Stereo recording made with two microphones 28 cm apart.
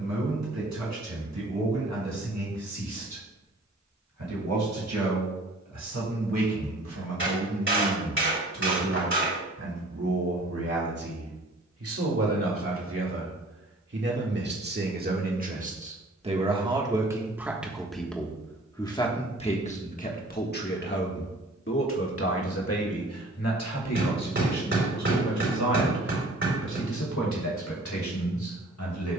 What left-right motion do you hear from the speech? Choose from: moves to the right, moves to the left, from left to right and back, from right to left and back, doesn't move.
moves to the left.